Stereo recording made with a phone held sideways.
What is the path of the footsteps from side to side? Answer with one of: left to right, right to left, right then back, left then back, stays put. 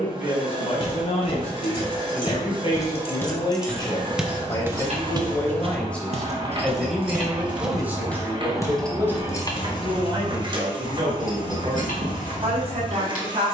right then back.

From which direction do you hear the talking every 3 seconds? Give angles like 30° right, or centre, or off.
50° left, 20° left, 10° right, 30° right, 50° right.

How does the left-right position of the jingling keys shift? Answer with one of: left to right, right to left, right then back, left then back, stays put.
right then back.